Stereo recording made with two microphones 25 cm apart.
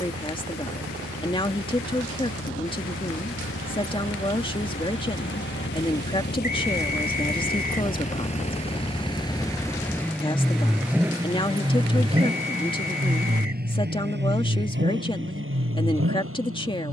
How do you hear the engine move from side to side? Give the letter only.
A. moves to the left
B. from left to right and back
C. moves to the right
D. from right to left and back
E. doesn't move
C.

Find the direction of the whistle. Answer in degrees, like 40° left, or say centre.
40° left.